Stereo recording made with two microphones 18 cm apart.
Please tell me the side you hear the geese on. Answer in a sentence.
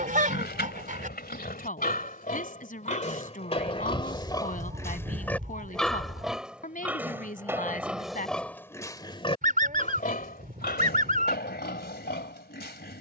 You can hear the geese on the right.